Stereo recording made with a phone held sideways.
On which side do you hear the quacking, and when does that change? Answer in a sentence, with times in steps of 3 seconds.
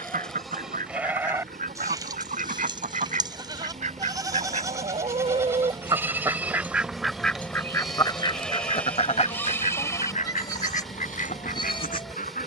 In this clip you hear the quacking on the right from 0 s, in the centre from 6 s and on the left from 9 s.